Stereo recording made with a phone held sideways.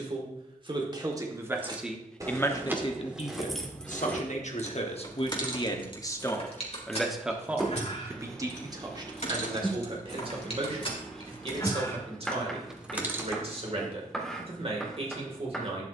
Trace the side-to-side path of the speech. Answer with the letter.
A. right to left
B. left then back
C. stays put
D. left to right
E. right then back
B.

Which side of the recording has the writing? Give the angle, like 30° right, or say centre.
centre.